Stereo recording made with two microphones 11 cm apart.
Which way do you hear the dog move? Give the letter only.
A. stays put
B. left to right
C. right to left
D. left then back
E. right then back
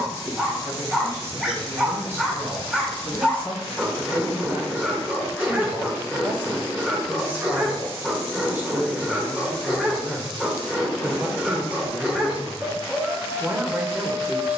A.